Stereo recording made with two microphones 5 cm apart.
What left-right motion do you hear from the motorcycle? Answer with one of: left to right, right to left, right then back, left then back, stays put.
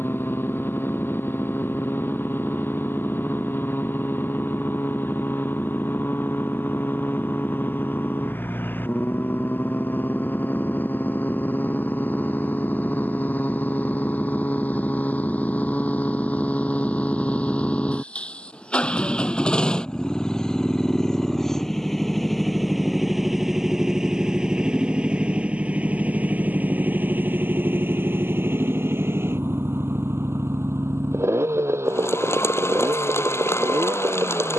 left to right.